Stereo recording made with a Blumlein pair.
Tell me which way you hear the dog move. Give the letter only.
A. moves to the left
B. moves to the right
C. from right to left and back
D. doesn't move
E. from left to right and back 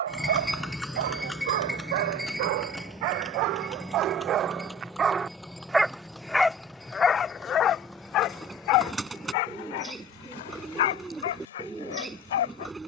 A.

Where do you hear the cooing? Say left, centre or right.
centre.